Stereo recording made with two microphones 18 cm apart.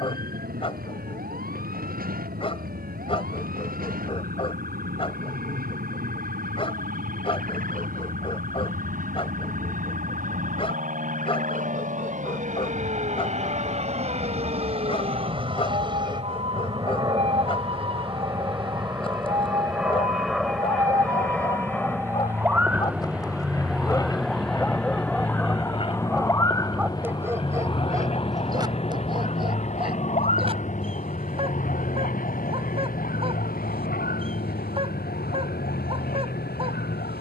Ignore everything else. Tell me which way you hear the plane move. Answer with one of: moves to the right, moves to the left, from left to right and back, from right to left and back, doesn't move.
moves to the left.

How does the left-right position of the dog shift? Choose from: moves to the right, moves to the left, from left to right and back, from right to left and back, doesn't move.
moves to the right.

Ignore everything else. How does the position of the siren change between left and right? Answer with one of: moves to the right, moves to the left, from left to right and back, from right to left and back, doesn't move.
moves to the left.